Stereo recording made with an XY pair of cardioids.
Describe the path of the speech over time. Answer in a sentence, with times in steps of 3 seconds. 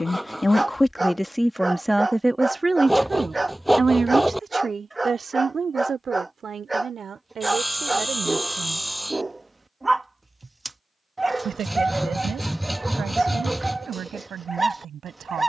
You can hear the speech in the centre from 0 s and on the right from 3 s.